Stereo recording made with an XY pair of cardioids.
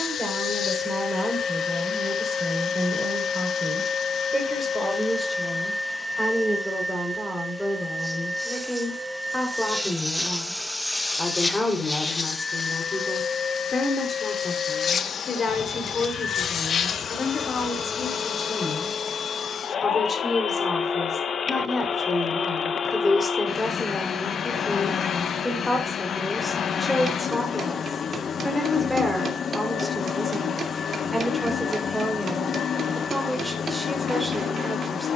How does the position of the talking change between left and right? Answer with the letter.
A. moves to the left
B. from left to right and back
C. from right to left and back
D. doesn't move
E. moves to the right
C.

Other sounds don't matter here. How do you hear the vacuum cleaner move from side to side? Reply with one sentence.
You can hear the vacuum cleaner move from left to right and back again.